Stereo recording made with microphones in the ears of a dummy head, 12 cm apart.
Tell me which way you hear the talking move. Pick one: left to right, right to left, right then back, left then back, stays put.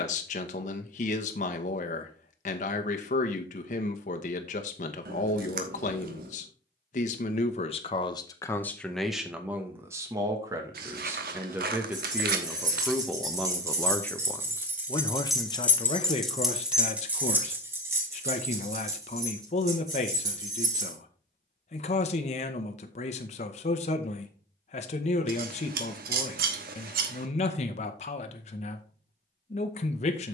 right then back.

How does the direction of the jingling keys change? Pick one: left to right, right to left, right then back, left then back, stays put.
left then back.